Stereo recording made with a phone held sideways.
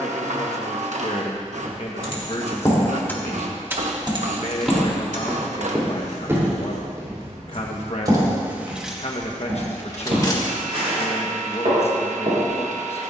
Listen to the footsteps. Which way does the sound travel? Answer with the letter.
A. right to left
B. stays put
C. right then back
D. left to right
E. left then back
D.